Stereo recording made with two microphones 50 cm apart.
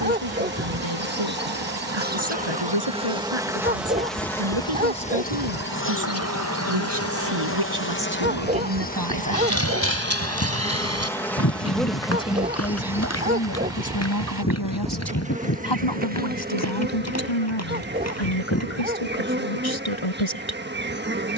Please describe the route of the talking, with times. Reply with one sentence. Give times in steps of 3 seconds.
You can hear the talking on the right from 0 s and on the left from 12 s.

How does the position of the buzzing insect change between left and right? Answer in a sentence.
You can hear the buzzing insect move from right to left and back again.